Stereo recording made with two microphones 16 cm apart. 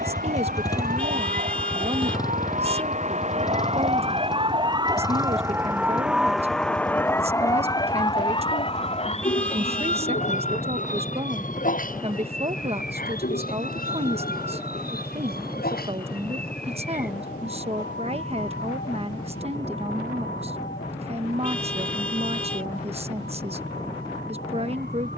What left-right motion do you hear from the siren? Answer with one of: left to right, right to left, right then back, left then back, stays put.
right to left.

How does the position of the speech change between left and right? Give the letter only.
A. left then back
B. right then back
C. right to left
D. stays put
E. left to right
D.